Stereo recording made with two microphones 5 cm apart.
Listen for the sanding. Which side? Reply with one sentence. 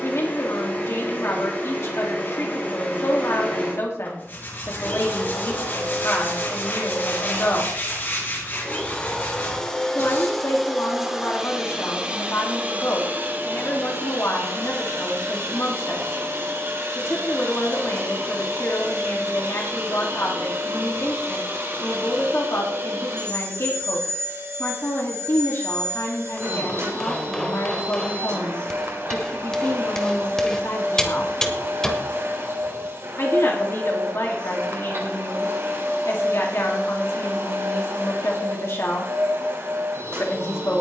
In this clip you hear the sanding on the left.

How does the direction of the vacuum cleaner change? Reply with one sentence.
You can hear the vacuum cleaner go from the left side to the right.